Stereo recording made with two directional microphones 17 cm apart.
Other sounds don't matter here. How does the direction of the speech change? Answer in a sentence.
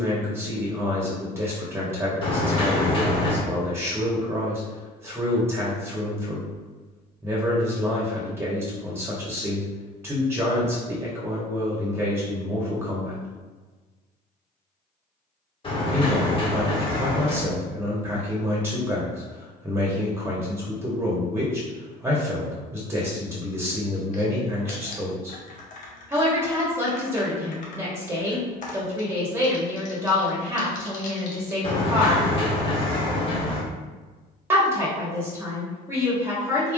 In this clip you hear the speech stay put.